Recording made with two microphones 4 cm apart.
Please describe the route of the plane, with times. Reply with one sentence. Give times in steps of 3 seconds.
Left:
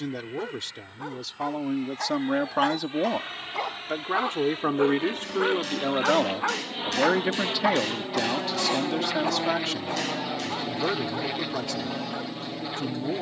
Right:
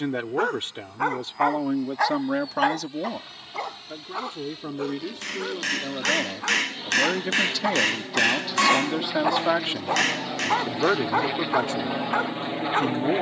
You can hear the plane on the left from 0 s, in the centre from 9 s and on the right from 12 s.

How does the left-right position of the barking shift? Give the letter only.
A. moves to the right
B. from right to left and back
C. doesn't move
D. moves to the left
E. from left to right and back
B.